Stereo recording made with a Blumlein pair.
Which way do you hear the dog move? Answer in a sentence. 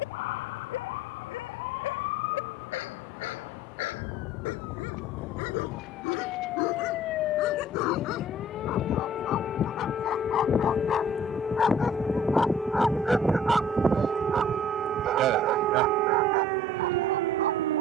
You can hear the dog move to the right.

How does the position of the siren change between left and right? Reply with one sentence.
In this clip you hear the siren travel towards the right.